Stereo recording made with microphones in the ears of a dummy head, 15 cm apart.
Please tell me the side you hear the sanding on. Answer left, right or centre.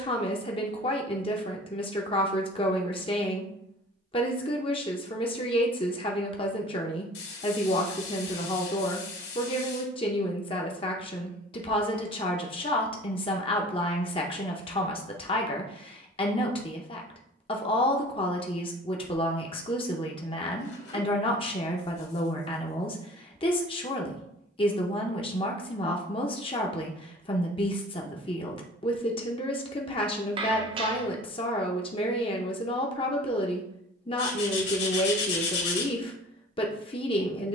left.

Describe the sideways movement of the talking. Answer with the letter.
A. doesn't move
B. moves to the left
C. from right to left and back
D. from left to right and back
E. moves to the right
A.